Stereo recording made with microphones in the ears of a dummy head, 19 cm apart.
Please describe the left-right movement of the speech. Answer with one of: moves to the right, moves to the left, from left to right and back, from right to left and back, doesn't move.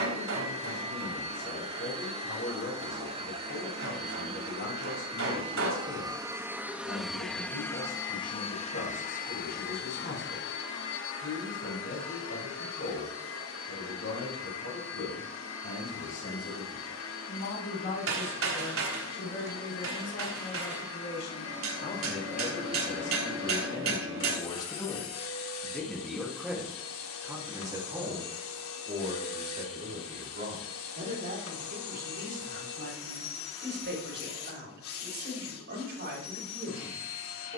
moves to the right.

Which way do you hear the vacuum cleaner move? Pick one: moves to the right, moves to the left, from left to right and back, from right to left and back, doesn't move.
moves to the left.